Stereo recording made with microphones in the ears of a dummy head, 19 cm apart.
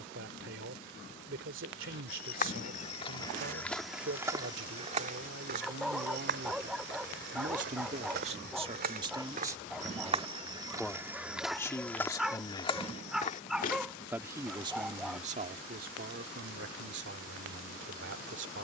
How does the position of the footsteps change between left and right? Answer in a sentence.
In this clip you hear the footsteps move from left to right and back again.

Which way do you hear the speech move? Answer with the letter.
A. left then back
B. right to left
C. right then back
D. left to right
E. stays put
A.